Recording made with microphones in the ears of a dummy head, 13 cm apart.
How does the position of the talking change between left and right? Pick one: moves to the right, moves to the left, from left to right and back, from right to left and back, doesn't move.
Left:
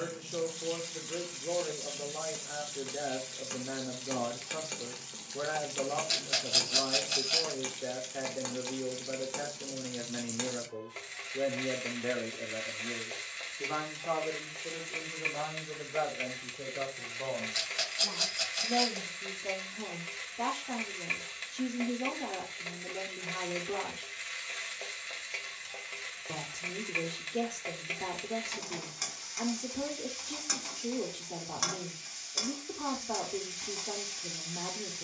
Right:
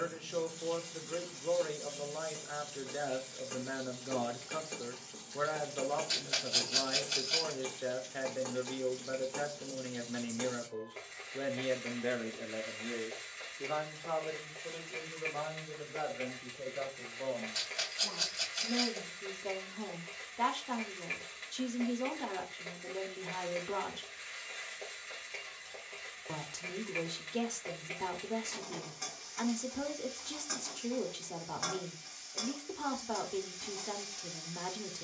from right to left and back.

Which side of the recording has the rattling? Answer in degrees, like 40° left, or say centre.
20° left.